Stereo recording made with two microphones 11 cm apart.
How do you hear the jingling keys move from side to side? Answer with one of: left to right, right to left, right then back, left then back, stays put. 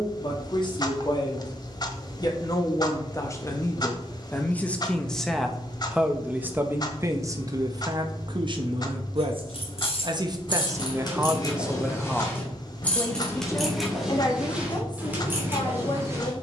left to right.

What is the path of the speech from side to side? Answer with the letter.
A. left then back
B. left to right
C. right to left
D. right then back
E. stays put
D.